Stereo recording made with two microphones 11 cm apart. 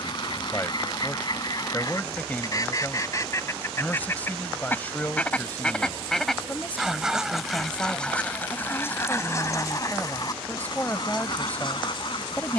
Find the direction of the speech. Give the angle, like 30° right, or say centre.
20° left.